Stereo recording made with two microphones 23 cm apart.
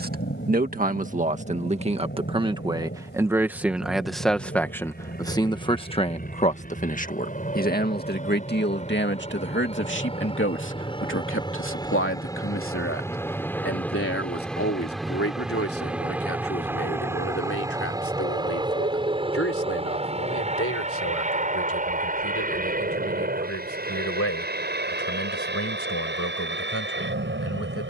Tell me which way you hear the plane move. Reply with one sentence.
In this clip you hear the plane go from the left side to the right.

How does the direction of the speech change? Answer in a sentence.
You can hear the speech go from the right side to the left.